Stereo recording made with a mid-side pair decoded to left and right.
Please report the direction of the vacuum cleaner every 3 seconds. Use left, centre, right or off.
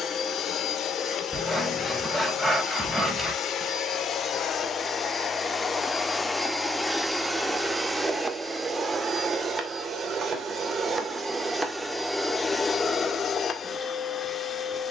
left, left, centre, right, left.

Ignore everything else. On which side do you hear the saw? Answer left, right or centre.
centre.